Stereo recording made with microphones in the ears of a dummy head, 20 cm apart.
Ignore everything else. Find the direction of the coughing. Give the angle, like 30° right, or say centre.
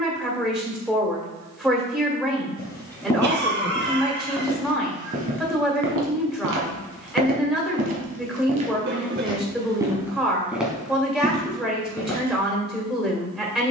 50° right.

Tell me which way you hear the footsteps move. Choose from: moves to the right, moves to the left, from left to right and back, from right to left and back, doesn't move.
from left to right and back.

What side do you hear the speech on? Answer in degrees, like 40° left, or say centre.
centre.